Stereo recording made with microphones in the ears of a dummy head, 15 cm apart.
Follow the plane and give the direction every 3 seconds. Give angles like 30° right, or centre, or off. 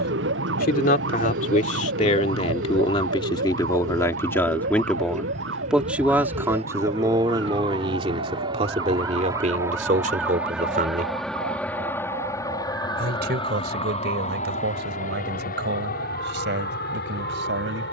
60° right, 50° right, 30° right, centre, 30° left, 60° left.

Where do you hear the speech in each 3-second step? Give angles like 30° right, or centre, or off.
40° left, 10° left, 20° right, 40° right, 60° right, 60° right.